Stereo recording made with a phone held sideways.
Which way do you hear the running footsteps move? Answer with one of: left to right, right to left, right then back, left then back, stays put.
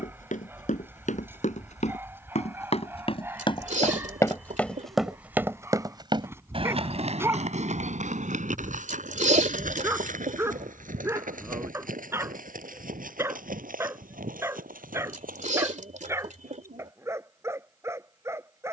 left to right.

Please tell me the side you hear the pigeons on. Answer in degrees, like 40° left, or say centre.
60° right.